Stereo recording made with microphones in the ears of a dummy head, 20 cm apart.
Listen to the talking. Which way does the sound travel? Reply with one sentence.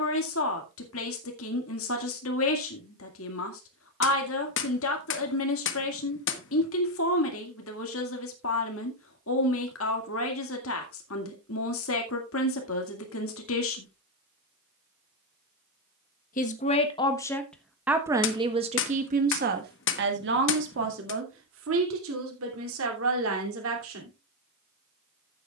In this clip you hear the talking travel towards the right.